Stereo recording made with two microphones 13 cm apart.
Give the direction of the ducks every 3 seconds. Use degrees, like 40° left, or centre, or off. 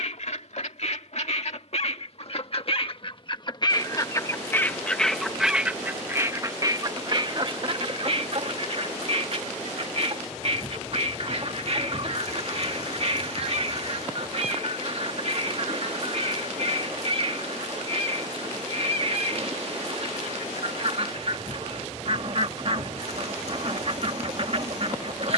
60° left, 20° left, 40° right, 50° right, 50° right, 50° right, 50° right, 50° right, 50° right.